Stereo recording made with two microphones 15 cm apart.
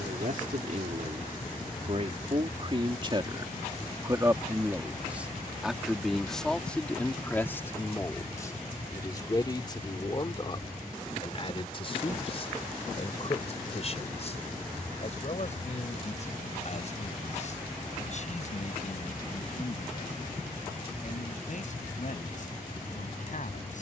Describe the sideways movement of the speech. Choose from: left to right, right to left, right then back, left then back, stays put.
right to left.